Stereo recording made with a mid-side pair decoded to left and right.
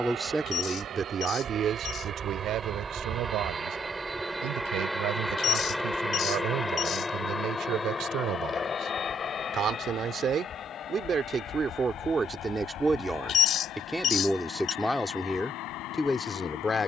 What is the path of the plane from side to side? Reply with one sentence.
You can hear the plane move to the left.